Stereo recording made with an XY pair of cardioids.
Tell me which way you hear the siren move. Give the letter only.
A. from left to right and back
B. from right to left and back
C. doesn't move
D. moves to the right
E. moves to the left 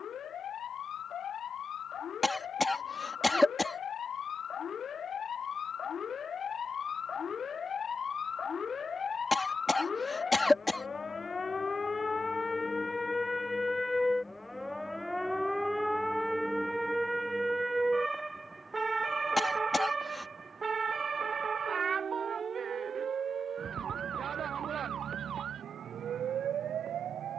D.